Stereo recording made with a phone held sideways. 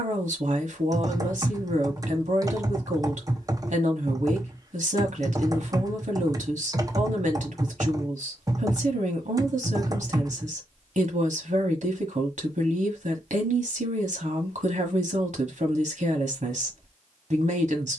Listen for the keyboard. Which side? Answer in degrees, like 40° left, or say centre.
30° right.